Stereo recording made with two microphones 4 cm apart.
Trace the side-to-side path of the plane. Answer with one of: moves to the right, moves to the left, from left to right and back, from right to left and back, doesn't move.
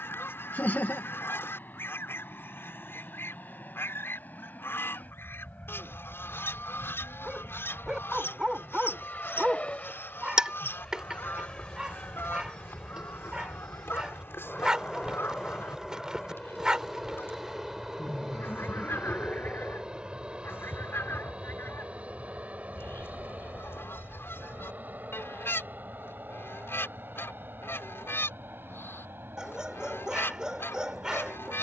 moves to the right.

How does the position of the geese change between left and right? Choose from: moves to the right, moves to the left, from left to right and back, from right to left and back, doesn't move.
doesn't move.